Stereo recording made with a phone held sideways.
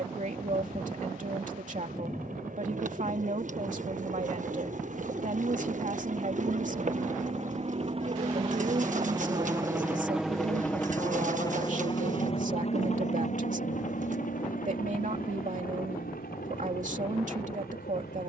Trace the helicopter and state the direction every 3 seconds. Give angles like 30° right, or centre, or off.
70° right, 60° right, 50° right, centre, 50° left, 70° left.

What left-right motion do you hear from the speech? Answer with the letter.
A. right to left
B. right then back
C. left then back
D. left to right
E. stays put
E.